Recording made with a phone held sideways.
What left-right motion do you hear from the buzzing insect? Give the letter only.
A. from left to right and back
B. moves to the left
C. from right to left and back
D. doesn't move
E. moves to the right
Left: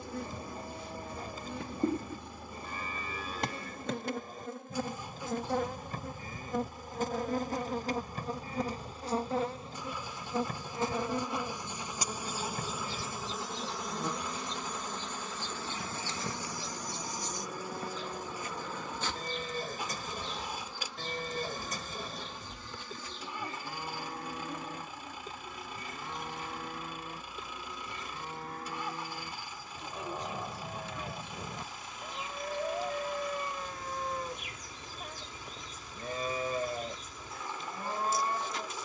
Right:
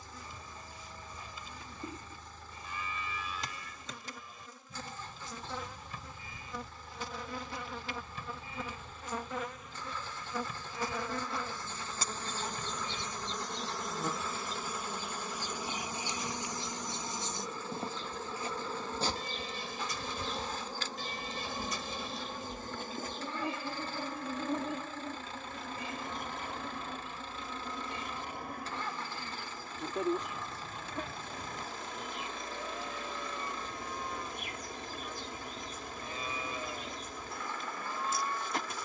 E.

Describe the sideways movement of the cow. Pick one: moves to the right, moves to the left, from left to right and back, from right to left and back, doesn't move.
doesn't move.